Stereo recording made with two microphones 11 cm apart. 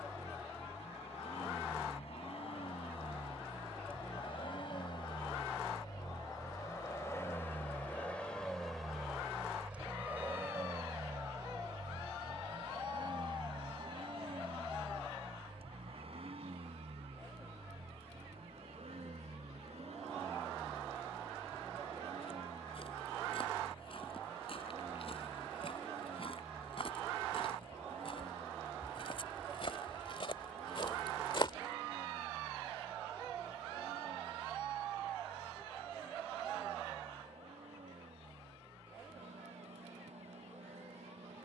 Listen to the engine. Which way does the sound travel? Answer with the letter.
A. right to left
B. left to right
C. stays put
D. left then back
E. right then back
B.